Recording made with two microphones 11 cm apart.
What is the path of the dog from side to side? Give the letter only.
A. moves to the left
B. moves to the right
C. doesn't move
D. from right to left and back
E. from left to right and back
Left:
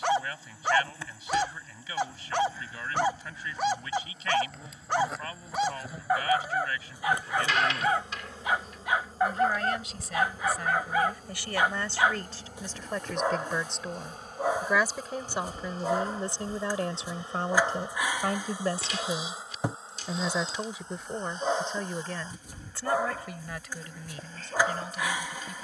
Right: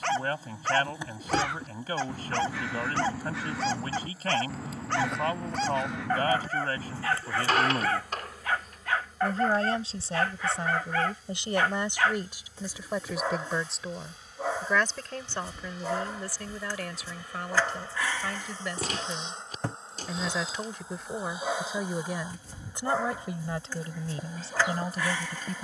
C.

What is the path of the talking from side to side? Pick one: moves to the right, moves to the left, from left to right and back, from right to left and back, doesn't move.
from right to left and back.